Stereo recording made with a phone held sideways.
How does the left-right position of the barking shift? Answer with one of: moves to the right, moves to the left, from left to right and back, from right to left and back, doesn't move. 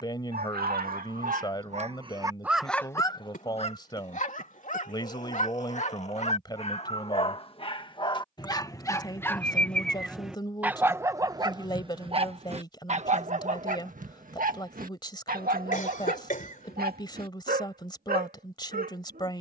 from right to left and back.